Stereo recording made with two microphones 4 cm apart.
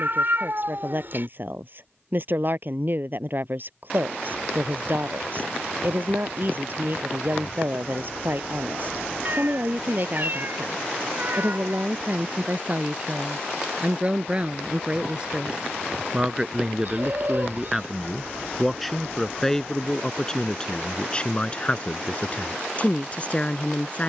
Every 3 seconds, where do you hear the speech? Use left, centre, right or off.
right, right, right, right, right, centre, centre, left.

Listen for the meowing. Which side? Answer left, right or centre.
right.